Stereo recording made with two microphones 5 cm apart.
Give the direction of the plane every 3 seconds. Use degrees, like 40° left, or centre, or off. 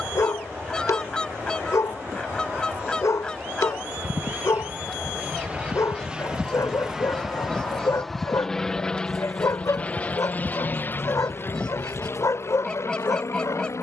50° right, 30° right, centre, 30° left, 50° left.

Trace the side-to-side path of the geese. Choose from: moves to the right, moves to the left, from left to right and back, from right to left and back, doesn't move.
doesn't move.